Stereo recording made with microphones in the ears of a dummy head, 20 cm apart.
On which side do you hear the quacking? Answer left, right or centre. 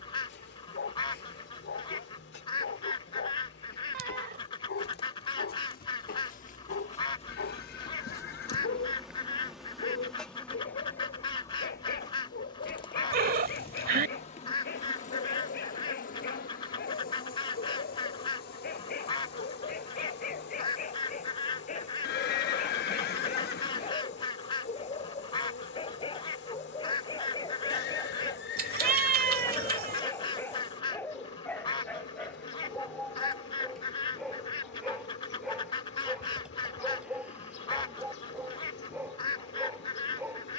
left.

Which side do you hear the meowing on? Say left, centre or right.
right.